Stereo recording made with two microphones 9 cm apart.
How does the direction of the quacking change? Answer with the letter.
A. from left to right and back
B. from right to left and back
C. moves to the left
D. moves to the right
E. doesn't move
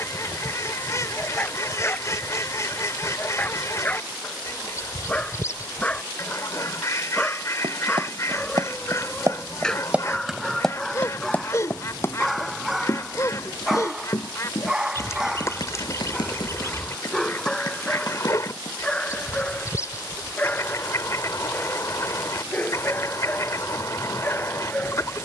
E.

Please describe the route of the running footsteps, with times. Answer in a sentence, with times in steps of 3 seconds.
You can hear the running footsteps not at all from 0 s, on the right from 6 s, in the centre from 9 s, on the left from 12 s and not at all from 21 s.